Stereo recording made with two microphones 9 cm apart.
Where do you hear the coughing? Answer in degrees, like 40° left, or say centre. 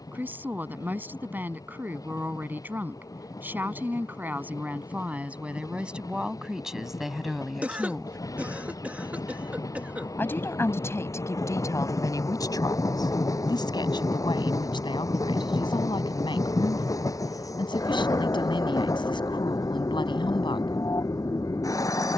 20° right.